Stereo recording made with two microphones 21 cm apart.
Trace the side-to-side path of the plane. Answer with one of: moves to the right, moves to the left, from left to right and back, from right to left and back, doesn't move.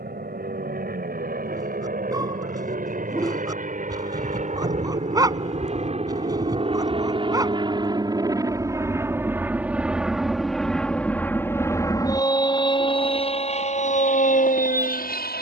moves to the left.